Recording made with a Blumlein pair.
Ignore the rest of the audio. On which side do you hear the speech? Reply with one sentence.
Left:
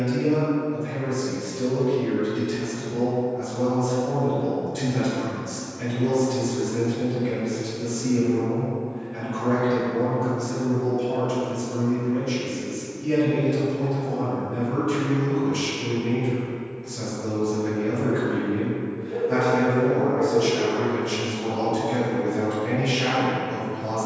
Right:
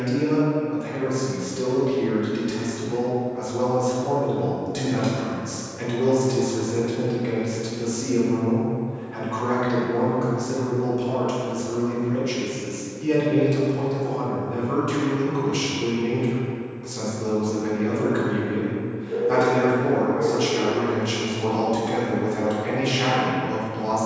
You can hear the speech on the right.